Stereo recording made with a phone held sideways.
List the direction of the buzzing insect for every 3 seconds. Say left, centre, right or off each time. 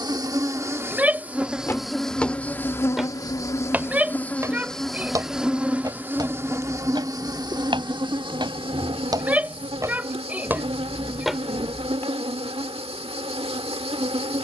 centre, centre, right, right, right.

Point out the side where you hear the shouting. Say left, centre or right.
centre.